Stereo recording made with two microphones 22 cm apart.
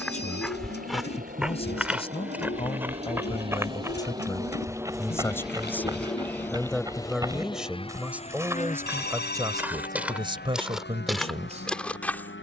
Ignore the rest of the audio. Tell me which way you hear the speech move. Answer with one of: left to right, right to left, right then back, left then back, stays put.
left to right.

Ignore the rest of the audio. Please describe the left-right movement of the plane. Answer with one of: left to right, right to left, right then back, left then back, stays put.
right to left.